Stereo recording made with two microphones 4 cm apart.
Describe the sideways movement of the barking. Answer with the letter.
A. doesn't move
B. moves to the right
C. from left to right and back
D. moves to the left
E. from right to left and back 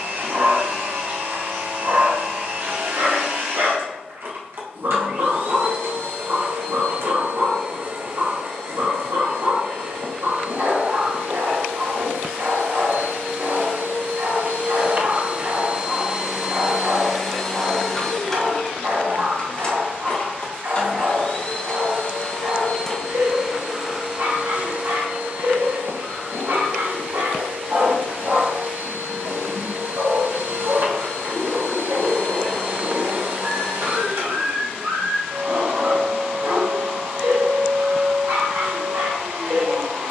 A.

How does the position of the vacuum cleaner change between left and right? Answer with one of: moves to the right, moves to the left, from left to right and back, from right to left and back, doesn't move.
from right to left and back.